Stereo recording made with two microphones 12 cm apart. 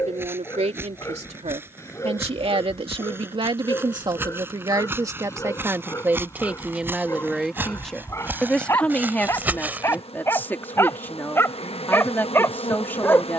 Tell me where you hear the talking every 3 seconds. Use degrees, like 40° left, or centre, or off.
60° right, 40° right, centre, 20° left, 20° left.